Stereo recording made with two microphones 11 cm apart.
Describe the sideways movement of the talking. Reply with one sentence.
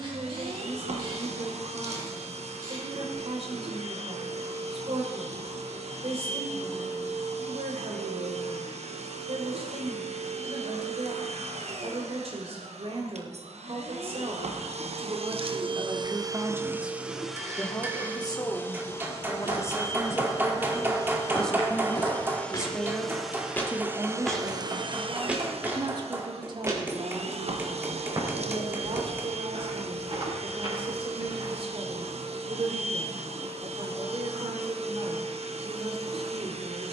You can hear the talking move from right to left and back again.